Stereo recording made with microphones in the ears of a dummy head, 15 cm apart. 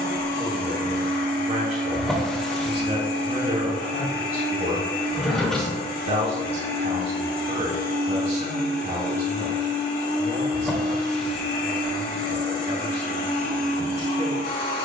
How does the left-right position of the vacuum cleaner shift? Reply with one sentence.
In this clip you hear the vacuum cleaner stay in one place.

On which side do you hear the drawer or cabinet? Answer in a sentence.
In this clip you hear the drawer or cabinet in the centre.